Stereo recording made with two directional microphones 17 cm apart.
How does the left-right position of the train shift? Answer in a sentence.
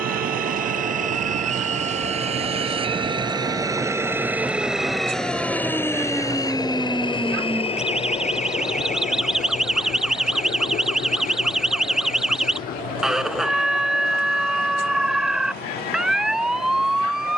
In this clip you hear the train move from right to left.